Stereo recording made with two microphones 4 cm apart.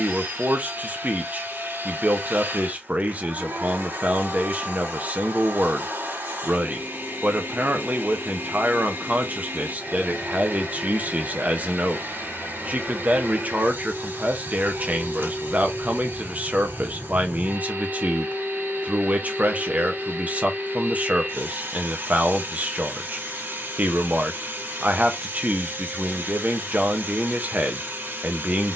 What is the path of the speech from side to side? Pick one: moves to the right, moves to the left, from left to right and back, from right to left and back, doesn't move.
doesn't move.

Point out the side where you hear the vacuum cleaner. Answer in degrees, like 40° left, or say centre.
70° right.